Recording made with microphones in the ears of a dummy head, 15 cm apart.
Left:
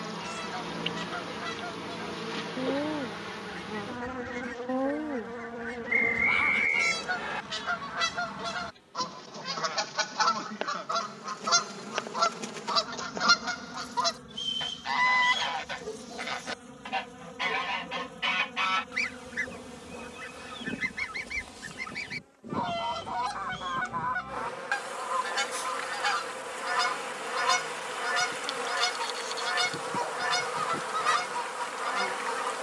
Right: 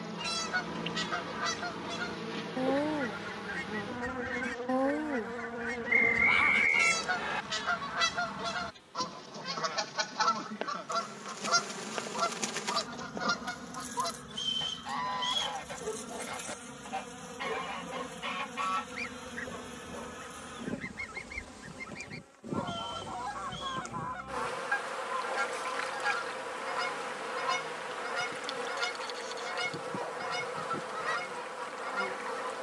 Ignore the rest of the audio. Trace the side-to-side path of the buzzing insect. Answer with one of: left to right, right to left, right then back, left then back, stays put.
right then back.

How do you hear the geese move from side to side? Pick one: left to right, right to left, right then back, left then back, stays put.
right to left.